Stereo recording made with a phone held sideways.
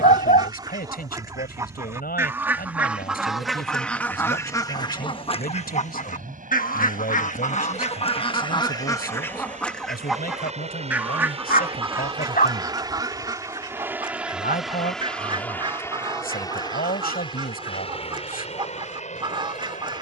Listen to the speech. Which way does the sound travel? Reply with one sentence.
You can hear the speech stay in one place.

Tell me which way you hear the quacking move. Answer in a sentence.
You can hear the quacking move from right to left and back again.